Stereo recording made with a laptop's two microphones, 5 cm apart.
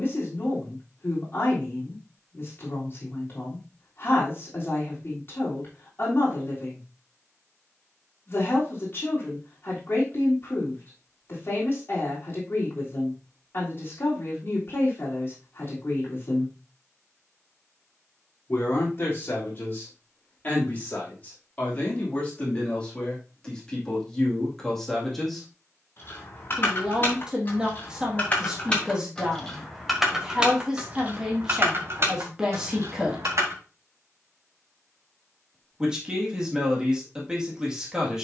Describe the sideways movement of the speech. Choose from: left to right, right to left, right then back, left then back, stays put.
left to right.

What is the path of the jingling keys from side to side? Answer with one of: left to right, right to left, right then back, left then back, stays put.
left to right.